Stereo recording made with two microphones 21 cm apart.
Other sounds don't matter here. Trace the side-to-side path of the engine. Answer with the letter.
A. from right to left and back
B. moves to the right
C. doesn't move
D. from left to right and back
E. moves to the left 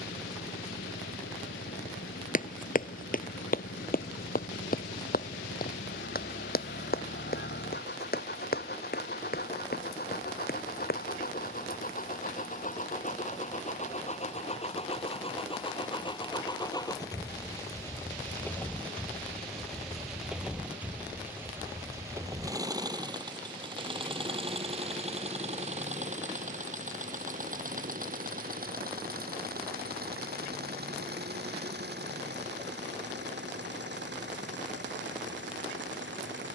B.